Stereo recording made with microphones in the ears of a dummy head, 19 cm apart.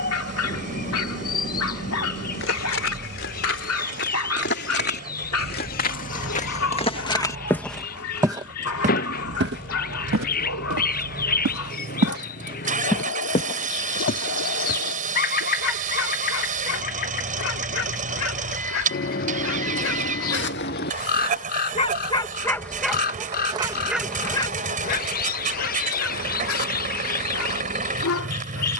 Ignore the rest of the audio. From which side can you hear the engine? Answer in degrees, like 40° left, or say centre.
40° right.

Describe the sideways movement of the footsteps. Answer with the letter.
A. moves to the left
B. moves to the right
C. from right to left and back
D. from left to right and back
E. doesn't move
D.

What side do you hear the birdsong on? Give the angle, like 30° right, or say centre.
40° left.